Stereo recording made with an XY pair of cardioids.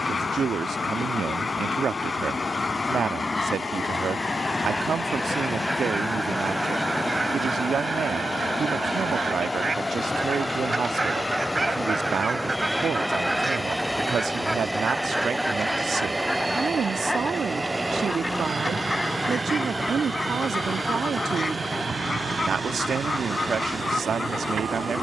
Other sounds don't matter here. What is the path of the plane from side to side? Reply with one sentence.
You can hear the plane go from the left side to the right.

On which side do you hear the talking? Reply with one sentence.
In this clip you hear the talking on the right.